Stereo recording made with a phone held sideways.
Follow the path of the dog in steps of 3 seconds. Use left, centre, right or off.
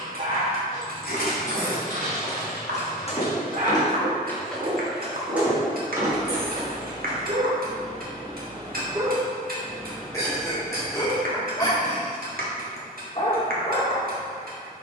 right, right, right, centre, left.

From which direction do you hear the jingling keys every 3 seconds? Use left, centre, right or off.
left, centre, right, off, off.